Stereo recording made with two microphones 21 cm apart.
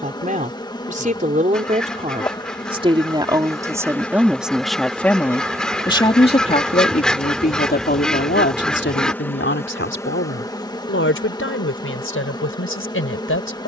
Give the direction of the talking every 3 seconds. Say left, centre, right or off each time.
right, centre, left, left, left.